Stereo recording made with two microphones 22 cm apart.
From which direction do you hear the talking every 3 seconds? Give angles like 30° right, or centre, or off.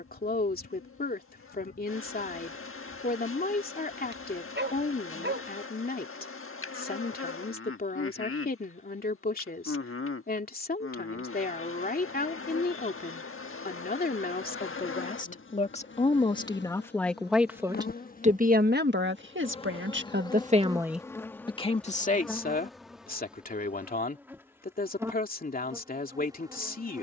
40° left, 40° left, 40° left, 40° left, 40° left, 20° left, 50° right, 40° left, 40° left.